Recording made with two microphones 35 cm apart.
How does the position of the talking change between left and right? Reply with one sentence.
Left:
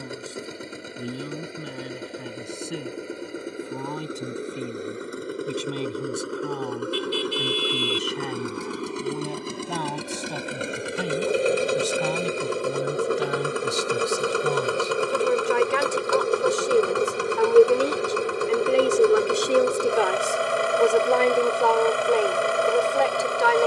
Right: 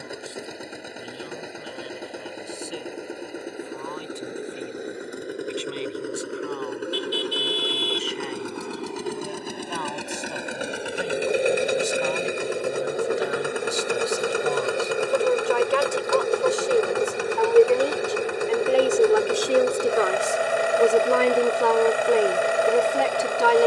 In this clip you hear the talking move to the right.